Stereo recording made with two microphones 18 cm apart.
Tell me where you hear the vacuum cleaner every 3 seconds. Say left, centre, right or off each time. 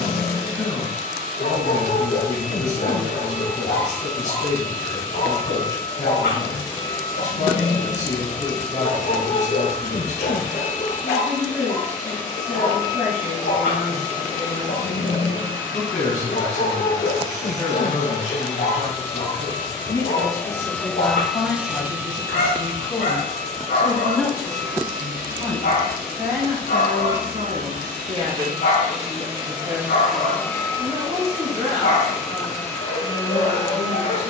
left, left, left, left, left, left, left, right, right, right, left, left.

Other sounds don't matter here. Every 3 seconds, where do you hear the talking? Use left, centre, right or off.
left, left, left, left, left, left, left, left, centre, right, right, right.